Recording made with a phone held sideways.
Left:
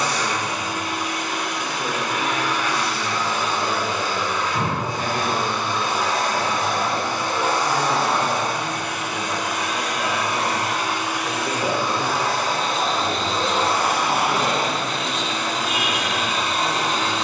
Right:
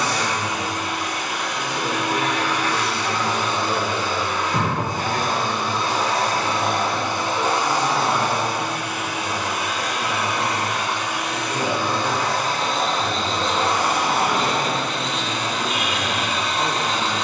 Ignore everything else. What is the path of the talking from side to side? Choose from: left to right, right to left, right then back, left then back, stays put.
left then back.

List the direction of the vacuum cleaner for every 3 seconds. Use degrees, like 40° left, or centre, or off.
80° right, 50° right, 20° right, centre, 10° left, 10° left.